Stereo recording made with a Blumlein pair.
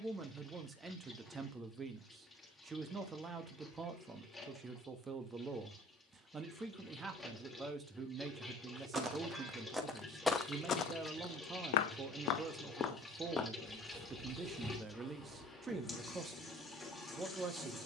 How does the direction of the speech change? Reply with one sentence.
You can hear the speech stay put.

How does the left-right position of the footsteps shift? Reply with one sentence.
You can hear the footsteps go left and come back.